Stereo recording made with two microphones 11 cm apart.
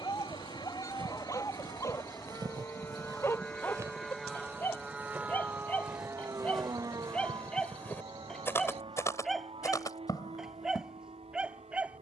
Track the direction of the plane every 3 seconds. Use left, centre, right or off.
left, centre, right, right.